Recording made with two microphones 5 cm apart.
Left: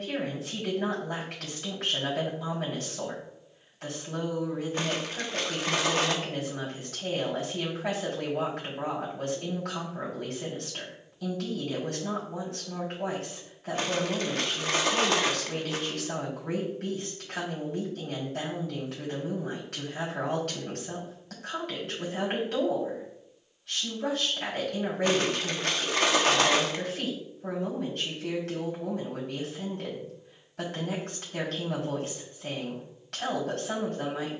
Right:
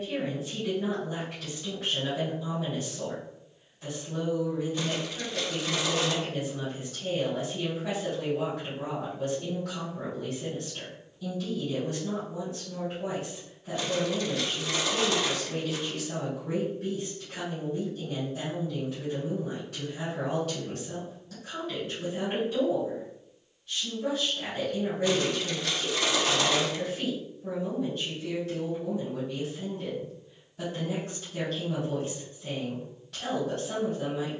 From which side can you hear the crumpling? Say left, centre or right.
left.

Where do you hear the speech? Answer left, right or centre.
left.